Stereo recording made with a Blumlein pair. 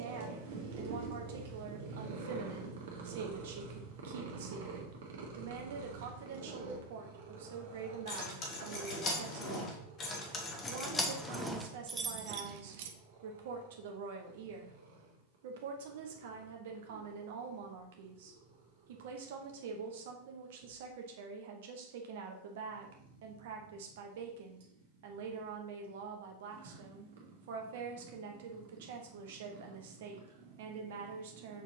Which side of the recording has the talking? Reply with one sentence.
You can hear the talking on the right.